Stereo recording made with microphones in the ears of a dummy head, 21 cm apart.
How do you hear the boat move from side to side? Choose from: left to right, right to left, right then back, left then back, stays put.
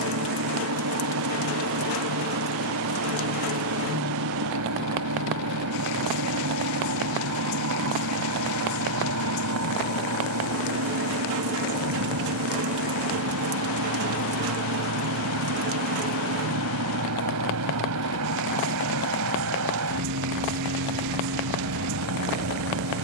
stays put.